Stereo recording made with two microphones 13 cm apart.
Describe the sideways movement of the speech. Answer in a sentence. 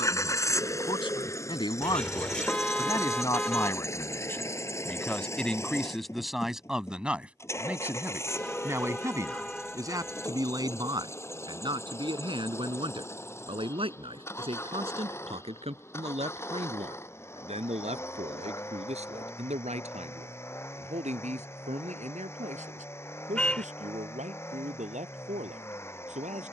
You can hear the speech move to the right.